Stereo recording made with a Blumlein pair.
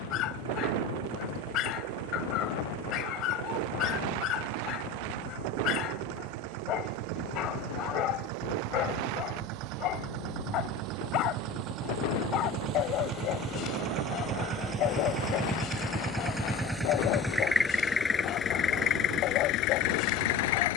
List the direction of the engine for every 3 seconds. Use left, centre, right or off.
right, right, right, right, right, centre, left.